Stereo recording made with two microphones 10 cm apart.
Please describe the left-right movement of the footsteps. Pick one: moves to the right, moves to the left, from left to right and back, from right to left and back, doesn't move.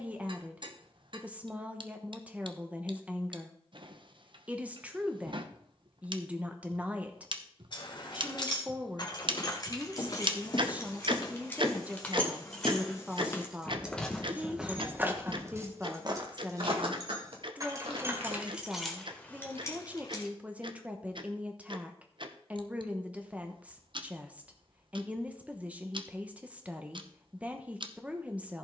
moves to the right.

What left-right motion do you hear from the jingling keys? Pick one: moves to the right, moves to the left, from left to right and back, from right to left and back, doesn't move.
from left to right and back.